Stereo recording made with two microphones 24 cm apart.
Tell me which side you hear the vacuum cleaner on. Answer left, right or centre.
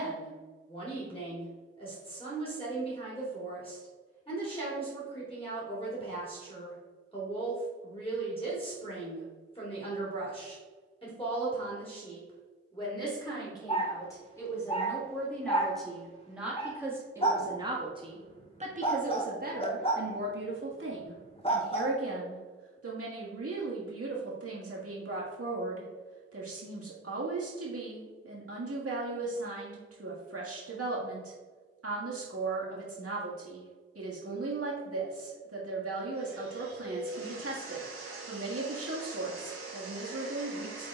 right.